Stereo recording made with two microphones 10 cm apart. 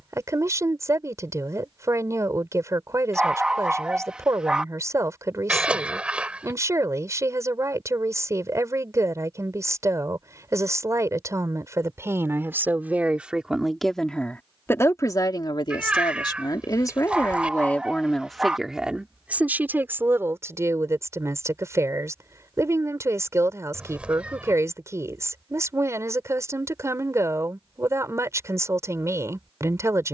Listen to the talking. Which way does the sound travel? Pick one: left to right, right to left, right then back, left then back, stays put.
left then back.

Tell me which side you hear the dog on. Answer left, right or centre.
centre.